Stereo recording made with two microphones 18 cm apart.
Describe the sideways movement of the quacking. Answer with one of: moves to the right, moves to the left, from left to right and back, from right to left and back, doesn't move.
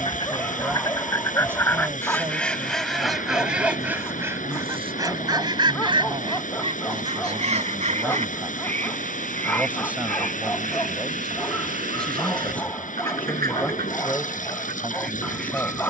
moves to the right.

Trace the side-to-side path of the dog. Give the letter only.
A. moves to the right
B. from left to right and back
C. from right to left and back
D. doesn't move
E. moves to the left
D.